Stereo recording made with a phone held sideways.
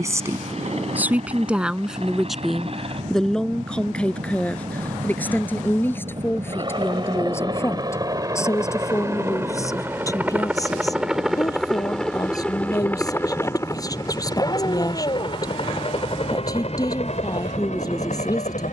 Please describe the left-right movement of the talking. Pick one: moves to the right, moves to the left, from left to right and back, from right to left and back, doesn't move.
moves to the left.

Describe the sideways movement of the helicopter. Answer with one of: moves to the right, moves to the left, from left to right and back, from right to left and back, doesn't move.
moves to the left.